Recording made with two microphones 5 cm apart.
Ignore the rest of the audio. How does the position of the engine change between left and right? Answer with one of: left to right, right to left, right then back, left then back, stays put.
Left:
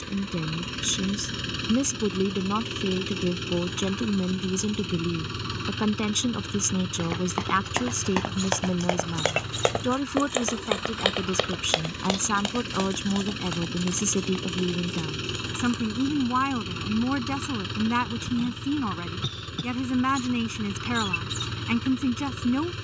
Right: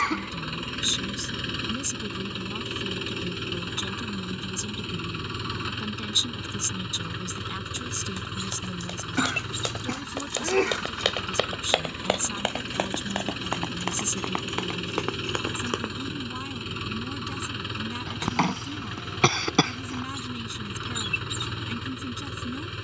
stays put.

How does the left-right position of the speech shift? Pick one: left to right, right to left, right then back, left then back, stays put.
stays put.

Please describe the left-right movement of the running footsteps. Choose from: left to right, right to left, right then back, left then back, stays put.
left to right.